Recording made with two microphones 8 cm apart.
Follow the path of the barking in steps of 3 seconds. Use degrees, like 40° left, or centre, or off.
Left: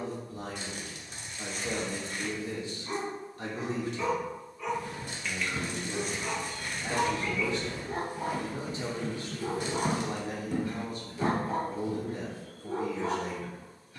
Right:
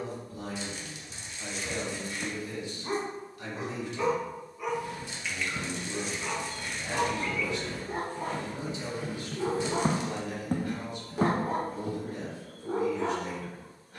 60° right, 20° right, 10° left, 60° right, 70° right.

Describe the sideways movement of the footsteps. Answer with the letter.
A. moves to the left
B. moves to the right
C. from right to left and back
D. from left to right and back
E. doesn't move
B.